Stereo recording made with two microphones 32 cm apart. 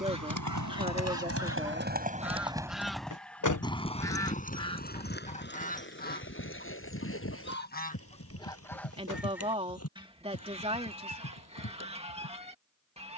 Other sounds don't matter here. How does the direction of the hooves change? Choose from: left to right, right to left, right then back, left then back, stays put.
right to left.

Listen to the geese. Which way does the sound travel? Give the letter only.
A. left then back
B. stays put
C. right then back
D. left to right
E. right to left
A.